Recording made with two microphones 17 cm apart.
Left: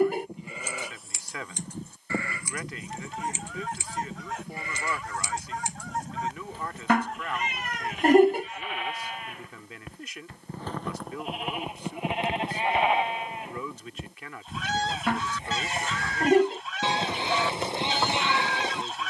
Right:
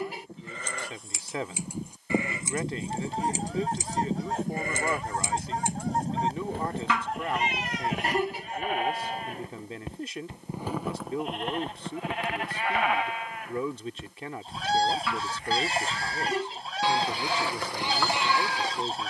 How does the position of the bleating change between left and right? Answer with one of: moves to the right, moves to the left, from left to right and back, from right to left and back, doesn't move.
from left to right and back.